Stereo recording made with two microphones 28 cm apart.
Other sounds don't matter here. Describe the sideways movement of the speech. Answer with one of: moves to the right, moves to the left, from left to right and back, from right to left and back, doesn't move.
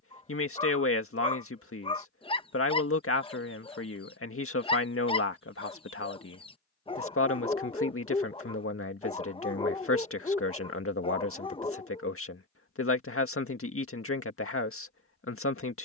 doesn't move.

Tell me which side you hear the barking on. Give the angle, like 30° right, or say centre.
20° left.